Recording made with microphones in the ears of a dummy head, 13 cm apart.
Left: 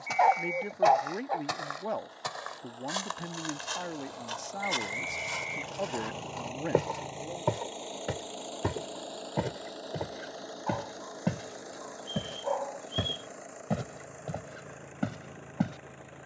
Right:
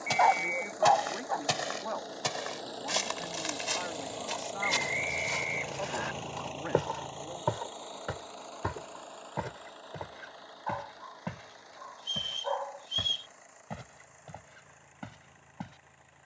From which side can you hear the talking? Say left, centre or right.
left.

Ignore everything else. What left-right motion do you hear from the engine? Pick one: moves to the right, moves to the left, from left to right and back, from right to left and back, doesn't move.
moves to the left.